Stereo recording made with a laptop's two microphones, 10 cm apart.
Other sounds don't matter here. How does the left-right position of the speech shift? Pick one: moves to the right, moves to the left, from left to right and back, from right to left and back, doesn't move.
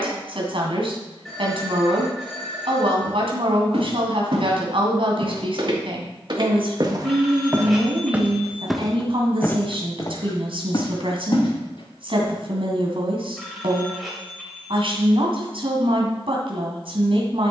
doesn't move.